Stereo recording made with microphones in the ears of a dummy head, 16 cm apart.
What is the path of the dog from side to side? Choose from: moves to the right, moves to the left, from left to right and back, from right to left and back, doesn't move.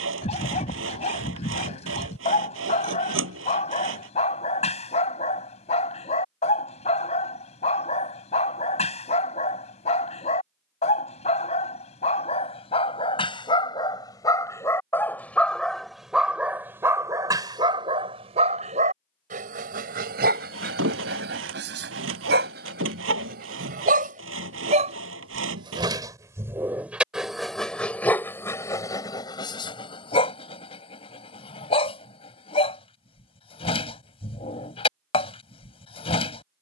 from left to right and back.